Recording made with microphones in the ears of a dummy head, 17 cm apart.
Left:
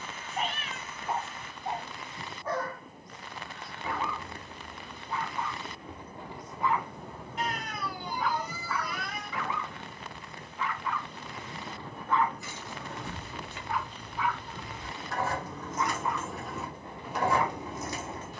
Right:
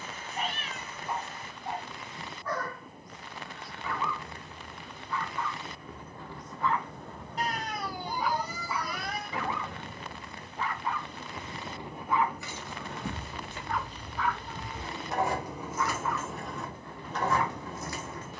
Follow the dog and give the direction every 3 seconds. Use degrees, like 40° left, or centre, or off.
20° left, 20° left, centre, 30° right, centre, 20° left.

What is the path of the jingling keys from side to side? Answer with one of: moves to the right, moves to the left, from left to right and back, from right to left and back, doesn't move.
moves to the left.